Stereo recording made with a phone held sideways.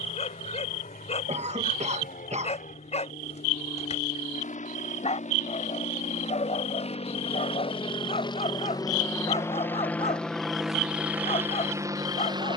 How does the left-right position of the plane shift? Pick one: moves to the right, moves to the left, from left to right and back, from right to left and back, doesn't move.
moves to the right.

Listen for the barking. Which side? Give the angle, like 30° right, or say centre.
40° left.